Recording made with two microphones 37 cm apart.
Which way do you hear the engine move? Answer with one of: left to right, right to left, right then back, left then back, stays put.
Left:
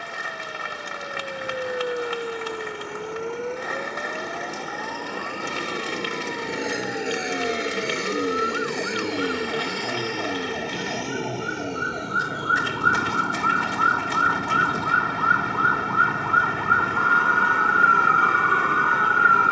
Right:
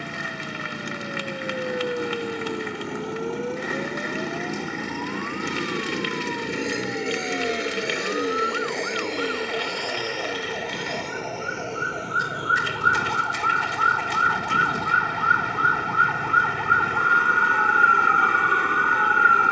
right to left.